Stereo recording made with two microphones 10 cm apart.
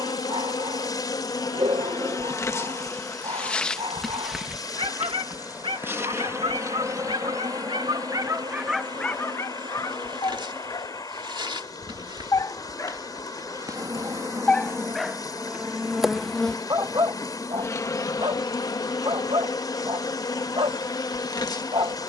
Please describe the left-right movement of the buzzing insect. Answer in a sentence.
In this clip you hear the buzzing insect go right and come back.